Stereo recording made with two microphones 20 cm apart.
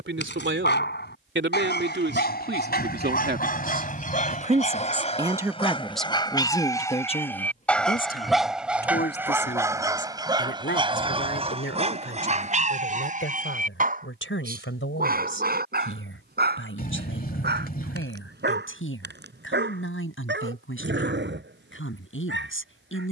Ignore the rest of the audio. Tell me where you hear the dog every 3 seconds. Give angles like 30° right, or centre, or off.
50° left, 40° left, 10° left, 20° right, 40° right, 50° right, 60° right, 60° right.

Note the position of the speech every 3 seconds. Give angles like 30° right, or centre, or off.
60° right, 30° right, 30° left, 60° left, 70° left, 80° left, 80° left, 80° left.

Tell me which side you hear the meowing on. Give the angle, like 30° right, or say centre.
50° left.